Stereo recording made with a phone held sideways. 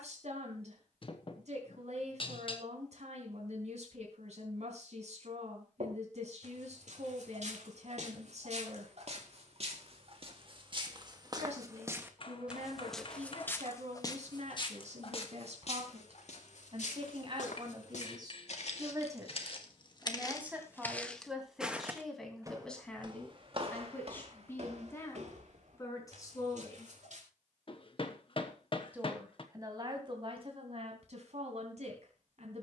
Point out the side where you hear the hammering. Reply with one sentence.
In this clip you hear the hammering on the left.